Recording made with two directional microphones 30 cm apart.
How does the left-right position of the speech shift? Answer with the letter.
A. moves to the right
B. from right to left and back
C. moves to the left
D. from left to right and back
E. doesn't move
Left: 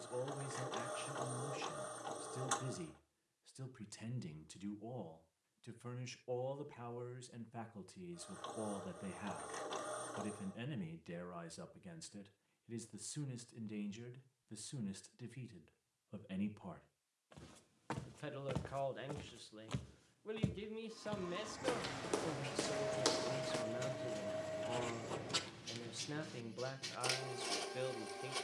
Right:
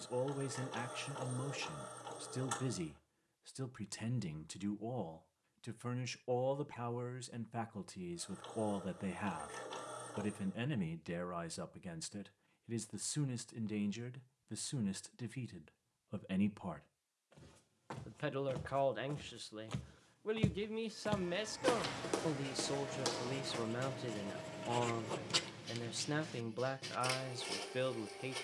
E.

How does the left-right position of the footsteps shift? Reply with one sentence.
You can hear the footsteps go right and come back.